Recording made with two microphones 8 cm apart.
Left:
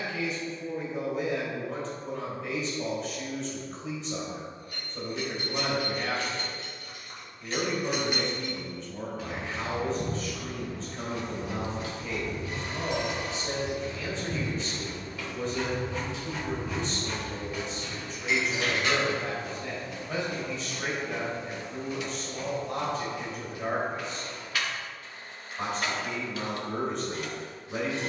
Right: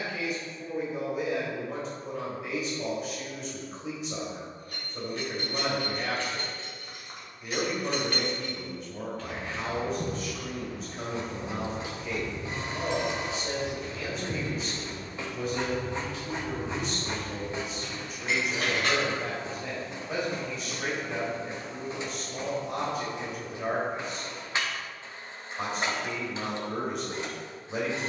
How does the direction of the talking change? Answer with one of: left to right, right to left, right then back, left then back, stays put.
stays put.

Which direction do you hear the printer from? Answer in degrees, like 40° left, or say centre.
30° right.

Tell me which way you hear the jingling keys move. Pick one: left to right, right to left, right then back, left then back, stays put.
left then back.